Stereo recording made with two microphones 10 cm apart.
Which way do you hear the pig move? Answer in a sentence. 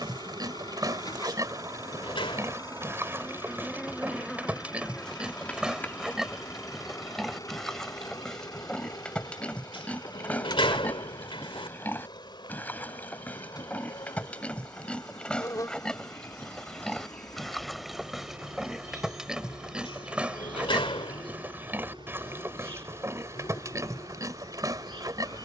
In this clip you hear the pig go left and come back.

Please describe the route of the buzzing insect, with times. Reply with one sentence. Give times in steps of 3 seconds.
You can hear the buzzing insect on the right from 0 s, in the centre from 3 s, on the left from 6 s and on the right from 18 s.